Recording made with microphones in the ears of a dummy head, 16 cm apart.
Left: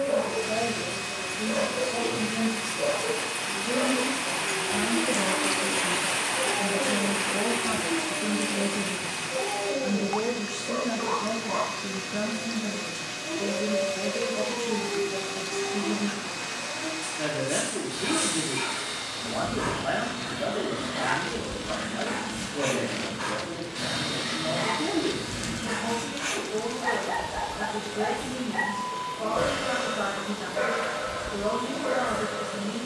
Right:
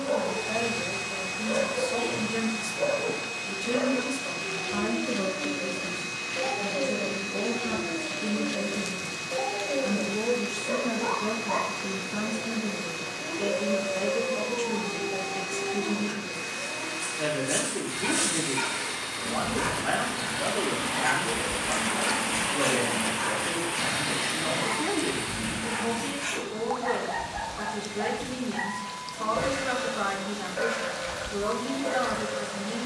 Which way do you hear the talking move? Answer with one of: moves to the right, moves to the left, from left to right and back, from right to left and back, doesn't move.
from right to left and back.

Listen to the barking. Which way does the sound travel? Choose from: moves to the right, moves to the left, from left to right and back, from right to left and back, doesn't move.
moves to the left.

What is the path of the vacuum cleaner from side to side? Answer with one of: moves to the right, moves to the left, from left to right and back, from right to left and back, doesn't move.
doesn't move.